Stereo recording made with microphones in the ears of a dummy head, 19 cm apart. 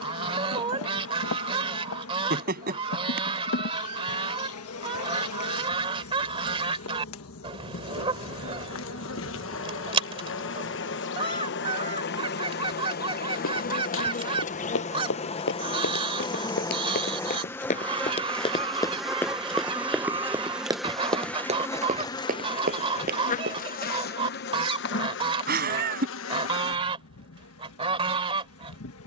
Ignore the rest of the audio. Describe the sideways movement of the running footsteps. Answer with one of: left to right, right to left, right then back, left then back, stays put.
left to right.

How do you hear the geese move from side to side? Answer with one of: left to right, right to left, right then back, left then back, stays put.
stays put.